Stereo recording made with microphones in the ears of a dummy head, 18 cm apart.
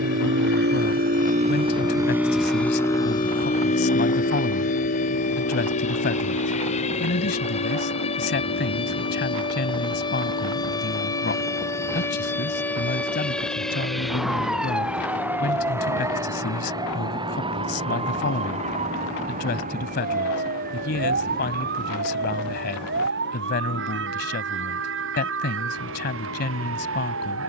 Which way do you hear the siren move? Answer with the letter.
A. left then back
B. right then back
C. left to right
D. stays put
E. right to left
C.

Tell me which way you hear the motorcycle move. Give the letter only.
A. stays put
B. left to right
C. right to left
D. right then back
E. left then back
C.